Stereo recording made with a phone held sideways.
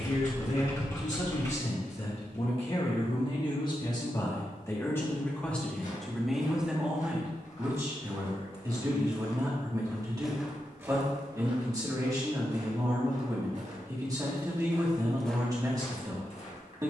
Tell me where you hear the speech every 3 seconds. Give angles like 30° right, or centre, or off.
50° left, 20° left, 10° right, 30° right, 30° right, 30° right.